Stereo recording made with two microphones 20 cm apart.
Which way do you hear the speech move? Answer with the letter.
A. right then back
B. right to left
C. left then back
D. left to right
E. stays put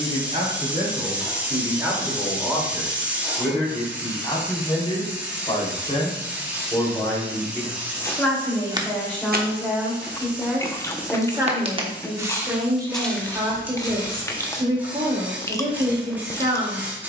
C.